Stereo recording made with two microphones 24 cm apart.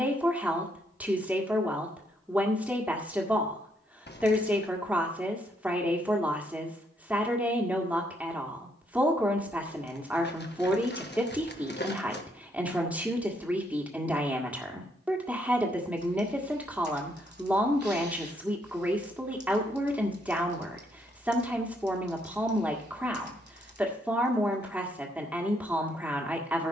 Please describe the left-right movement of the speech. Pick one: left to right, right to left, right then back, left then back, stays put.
stays put.